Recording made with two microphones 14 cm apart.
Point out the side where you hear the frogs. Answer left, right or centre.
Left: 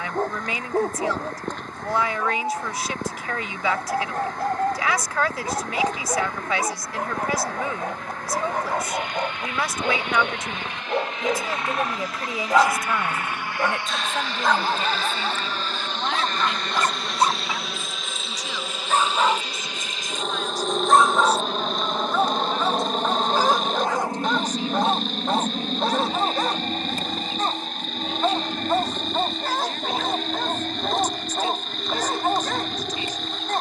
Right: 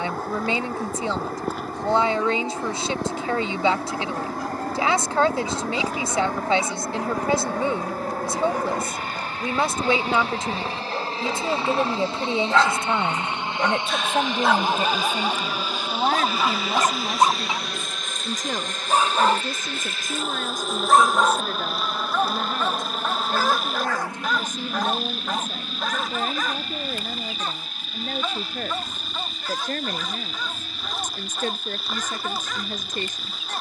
centre.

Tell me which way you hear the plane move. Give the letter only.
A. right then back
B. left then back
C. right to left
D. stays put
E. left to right
C.